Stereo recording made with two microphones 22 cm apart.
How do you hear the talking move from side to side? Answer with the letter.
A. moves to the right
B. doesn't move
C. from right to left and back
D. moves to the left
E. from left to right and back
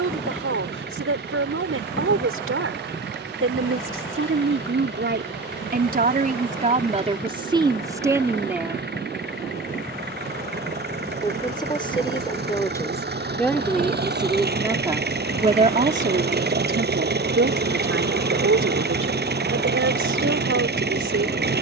C.